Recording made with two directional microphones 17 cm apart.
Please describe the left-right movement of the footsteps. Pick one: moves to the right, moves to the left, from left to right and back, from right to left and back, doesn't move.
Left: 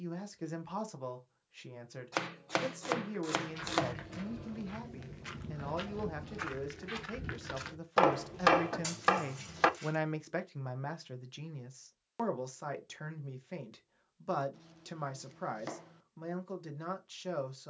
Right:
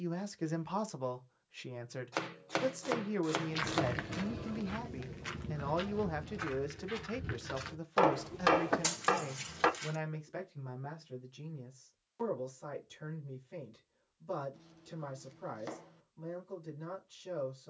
from right to left and back.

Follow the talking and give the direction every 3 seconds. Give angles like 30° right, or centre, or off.
20° right, 20° right, 10° right, 50° left, 70° left, 70° left.